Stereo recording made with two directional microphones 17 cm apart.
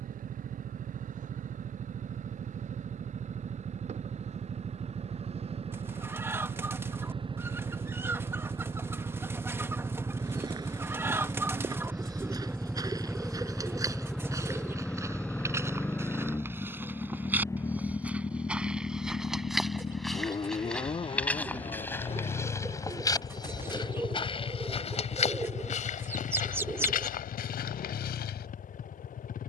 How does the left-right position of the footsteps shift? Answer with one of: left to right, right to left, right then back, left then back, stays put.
right to left.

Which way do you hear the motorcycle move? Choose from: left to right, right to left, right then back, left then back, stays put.
right to left.